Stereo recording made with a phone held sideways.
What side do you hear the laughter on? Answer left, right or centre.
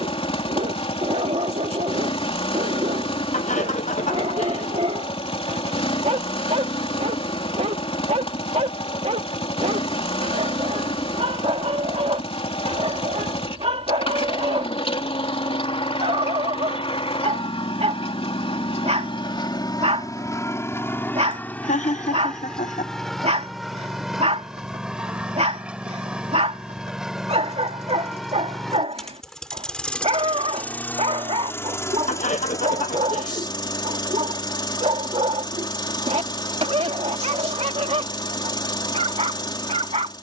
left.